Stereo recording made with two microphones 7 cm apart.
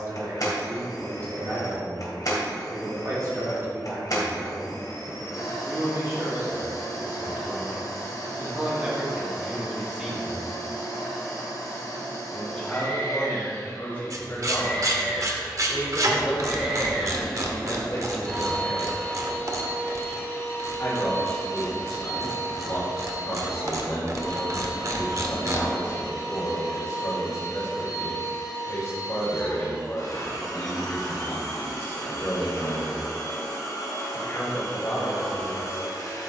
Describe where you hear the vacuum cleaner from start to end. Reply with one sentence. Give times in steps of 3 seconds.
You can hear the vacuum cleaner on the left from 0 s, in the centre from 15 s and on the left from 18 s.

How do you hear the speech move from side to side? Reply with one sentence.
In this clip you hear the speech move to the left.